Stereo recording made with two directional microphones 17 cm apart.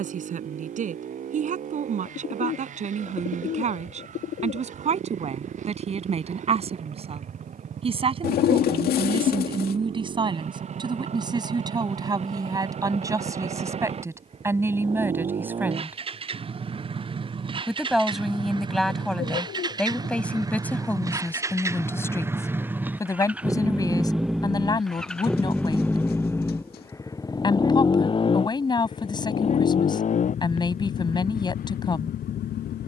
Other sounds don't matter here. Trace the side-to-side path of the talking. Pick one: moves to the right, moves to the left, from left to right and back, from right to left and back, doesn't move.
moves to the left.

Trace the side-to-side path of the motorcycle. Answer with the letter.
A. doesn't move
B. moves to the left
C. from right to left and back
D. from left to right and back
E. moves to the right
B.